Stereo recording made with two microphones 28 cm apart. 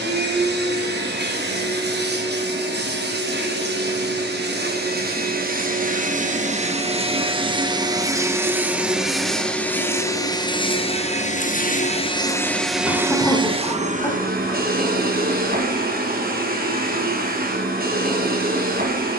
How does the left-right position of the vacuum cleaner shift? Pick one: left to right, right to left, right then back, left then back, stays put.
left then back.